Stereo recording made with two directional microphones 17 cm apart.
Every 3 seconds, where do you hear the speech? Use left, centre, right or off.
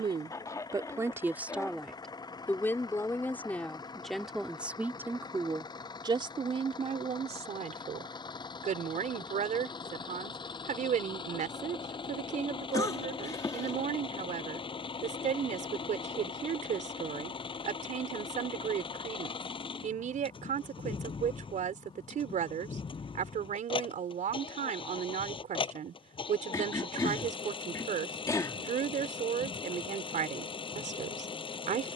centre, centre, right, right, right, right, right, right, right, right, right.